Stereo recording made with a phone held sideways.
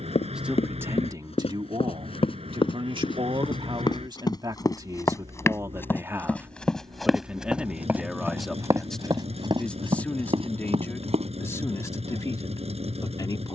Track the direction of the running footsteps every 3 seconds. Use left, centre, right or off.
left, left, centre, right, off.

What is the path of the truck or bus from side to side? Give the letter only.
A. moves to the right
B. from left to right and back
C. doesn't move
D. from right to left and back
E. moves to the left
C.